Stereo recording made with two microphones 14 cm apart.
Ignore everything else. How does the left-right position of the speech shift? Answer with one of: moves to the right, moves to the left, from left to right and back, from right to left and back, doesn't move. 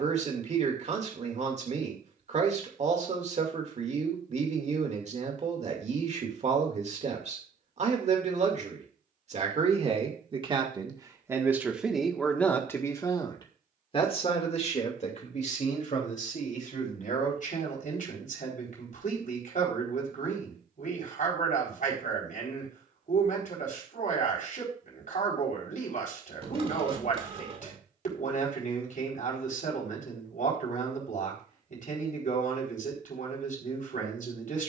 moves to the left.